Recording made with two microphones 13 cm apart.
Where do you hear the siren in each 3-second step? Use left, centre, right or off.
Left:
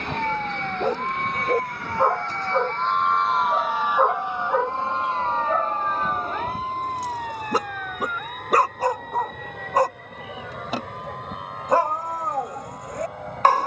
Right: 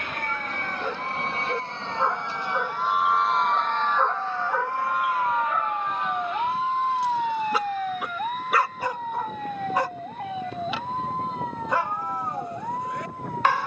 left, centre, right, right, right.